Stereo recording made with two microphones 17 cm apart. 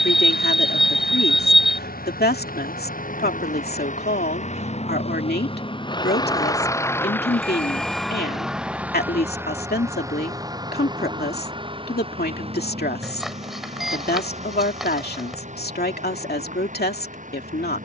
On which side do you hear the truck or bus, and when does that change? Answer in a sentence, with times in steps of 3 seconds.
In this clip you hear the truck or bus on the left from 0 s, in the centre from 6 s and on the right from 9 s.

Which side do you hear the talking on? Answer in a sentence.
In this clip you hear the talking on the left.